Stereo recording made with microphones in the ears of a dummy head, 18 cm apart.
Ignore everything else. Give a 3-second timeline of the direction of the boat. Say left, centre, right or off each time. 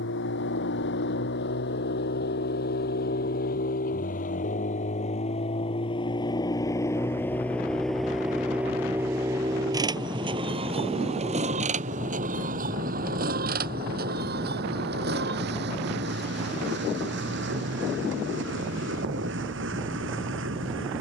left, left, centre, right, right, right, right.